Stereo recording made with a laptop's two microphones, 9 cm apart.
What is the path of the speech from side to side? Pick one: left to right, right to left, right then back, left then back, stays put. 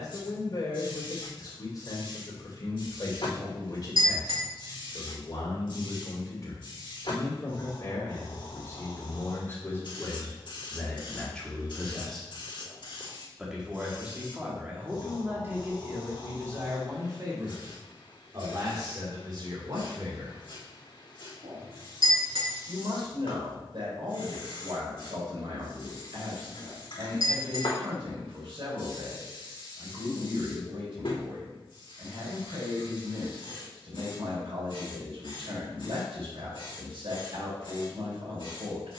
left to right.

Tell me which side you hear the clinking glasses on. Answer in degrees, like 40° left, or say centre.
70° right.